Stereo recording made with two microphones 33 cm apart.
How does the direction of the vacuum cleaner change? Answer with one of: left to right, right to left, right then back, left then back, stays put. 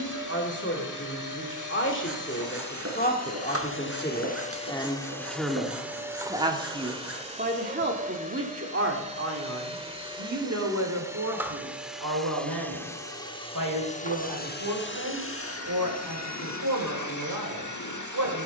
right then back.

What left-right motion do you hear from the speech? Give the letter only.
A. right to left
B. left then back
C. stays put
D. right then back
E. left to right
E.